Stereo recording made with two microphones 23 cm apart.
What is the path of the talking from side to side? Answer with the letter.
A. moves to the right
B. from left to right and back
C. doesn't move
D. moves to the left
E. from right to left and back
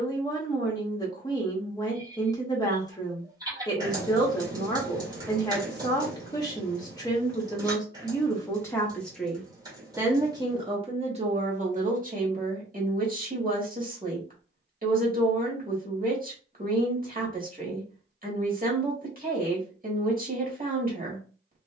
A.